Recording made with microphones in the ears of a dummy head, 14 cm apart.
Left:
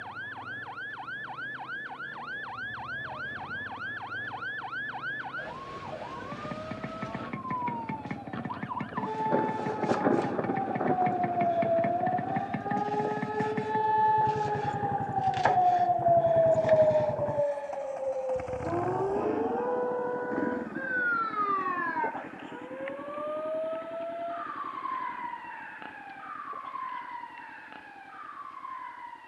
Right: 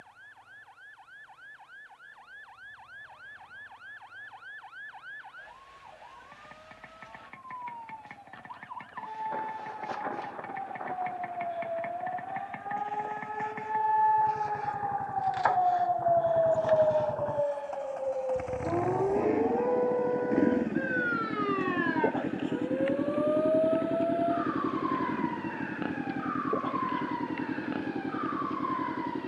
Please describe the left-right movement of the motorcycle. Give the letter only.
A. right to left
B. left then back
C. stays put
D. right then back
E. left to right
E.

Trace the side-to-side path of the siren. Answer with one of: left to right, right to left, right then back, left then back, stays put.
left to right.